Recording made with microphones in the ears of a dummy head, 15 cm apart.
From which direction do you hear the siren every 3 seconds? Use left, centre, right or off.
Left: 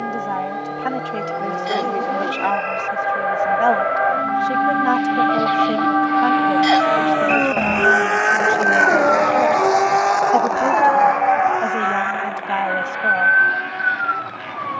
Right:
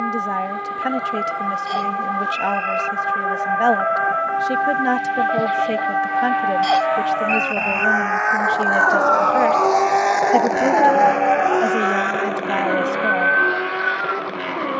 right, right, centre, left, left.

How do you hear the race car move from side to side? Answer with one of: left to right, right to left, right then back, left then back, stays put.
left to right.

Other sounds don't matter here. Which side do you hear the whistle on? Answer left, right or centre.
centre.